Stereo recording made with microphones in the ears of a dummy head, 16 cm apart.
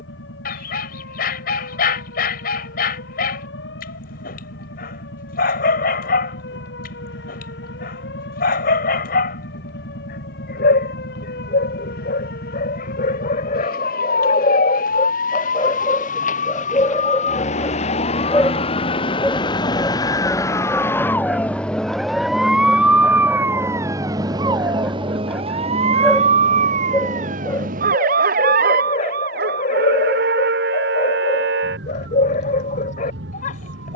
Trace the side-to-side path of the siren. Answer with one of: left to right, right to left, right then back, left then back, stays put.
left to right.